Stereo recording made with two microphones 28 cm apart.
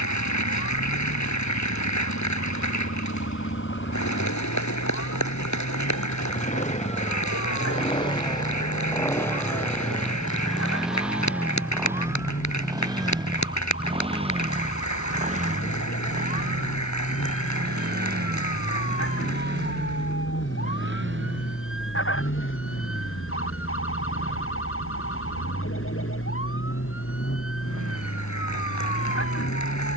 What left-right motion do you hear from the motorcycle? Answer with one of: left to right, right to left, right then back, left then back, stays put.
left to right.